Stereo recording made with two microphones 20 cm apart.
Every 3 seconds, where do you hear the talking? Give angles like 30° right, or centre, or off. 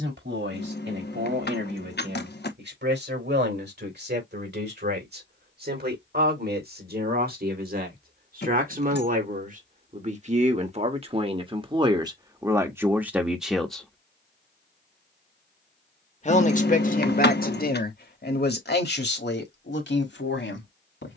60° right, 60° right, 50° right, 30° right, 10° right, 40° left, 60° left.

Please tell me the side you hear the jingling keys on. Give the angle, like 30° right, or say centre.
60° left.